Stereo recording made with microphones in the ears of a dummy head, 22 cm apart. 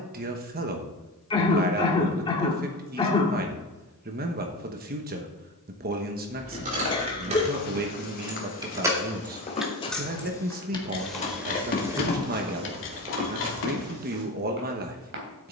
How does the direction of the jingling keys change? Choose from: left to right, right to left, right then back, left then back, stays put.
right to left.